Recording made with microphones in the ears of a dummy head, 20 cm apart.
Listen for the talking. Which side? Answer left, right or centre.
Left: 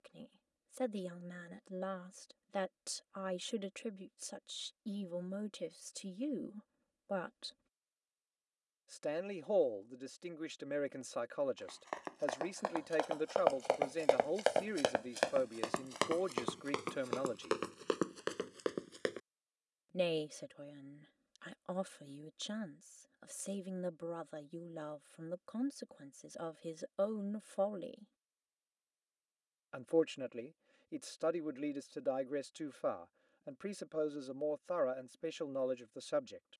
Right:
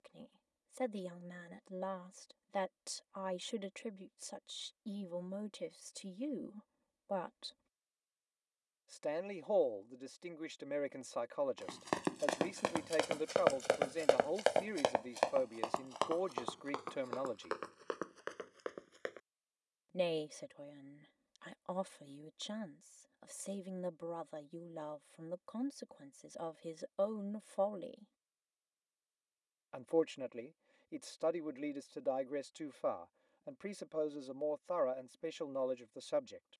centre.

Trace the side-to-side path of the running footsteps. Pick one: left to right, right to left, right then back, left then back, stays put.
right to left.